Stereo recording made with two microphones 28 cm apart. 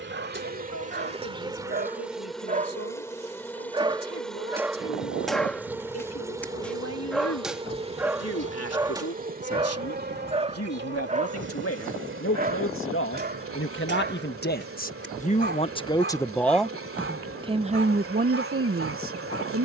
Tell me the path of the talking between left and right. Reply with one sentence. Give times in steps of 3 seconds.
In this clip you hear the talking on the left from 0 s, in the centre from 15 s and on the right from 18 s.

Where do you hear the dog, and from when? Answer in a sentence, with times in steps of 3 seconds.
You can hear the dog on the right from 0 s, in the centre from 3 s and on the right from 9 s.